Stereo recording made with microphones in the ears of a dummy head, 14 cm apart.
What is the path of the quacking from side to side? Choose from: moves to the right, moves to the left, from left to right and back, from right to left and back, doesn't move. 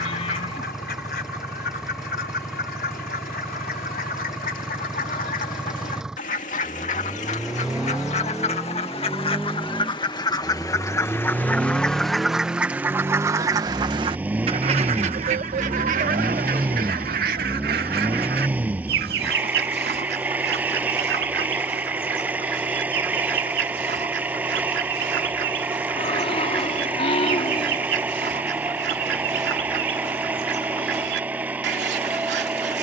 moves to the right.